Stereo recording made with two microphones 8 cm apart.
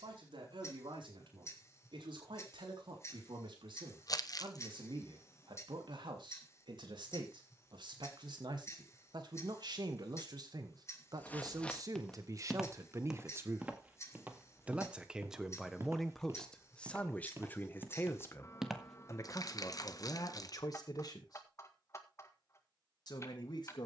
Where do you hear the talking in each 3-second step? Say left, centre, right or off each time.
right, right, right, right, right, centre, left, left.